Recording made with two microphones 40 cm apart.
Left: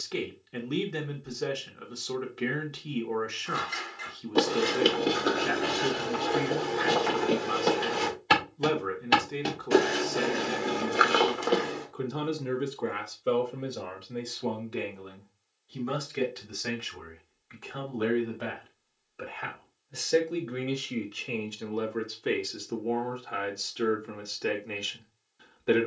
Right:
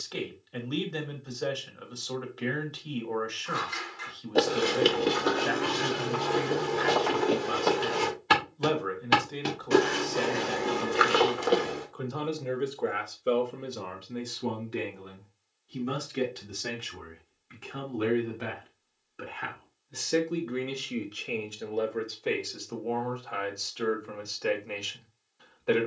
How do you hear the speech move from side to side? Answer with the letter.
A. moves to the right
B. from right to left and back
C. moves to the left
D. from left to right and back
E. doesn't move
D.